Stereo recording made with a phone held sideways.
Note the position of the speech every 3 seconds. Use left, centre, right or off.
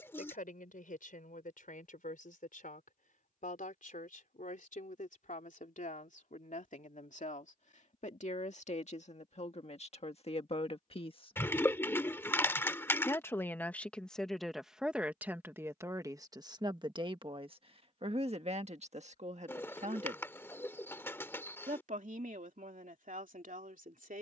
left, left, left, left, centre, right, right, right.